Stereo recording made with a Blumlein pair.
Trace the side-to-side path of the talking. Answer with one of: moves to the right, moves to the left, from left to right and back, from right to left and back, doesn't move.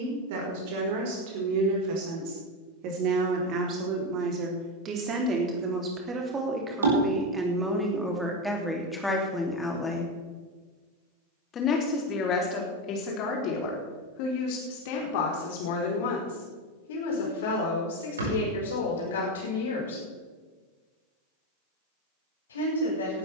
moves to the left.